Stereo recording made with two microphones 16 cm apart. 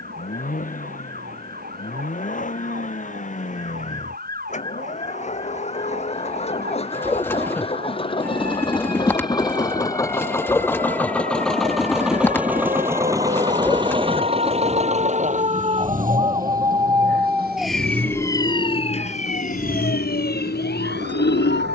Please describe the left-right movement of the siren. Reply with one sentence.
In this clip you hear the siren go from the right side to the left.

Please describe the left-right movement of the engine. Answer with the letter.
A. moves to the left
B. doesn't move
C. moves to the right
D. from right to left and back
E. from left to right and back
C.